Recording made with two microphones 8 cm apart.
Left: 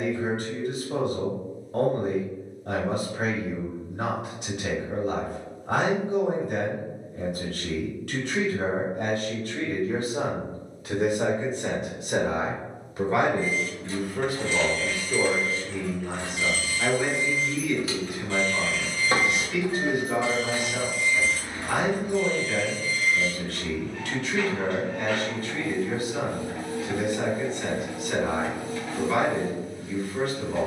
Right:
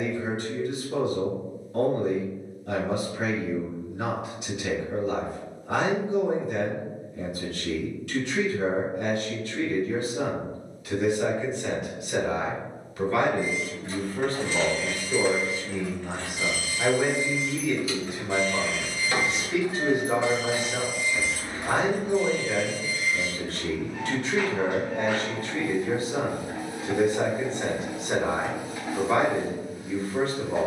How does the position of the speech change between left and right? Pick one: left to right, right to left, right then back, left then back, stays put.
left to right.